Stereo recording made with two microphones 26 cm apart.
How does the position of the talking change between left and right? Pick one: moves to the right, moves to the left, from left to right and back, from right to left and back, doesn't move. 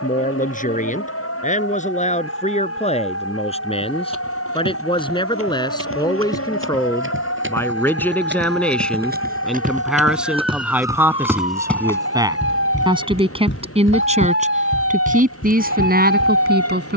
moves to the right.